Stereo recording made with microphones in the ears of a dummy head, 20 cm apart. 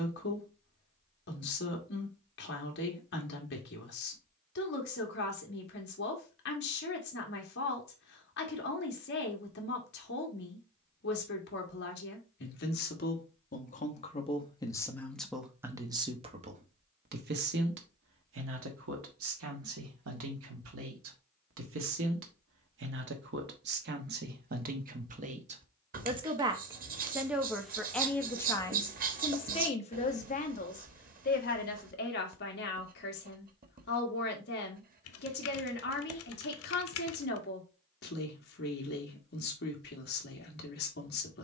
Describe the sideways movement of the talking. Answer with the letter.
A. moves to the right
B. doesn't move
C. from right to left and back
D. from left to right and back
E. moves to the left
D.